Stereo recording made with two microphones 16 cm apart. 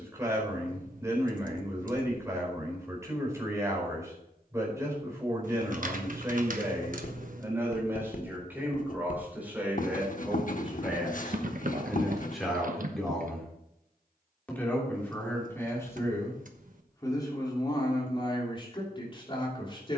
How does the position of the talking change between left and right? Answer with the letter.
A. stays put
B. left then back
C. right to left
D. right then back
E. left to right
C.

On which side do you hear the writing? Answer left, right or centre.
left.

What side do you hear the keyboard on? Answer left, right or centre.
right.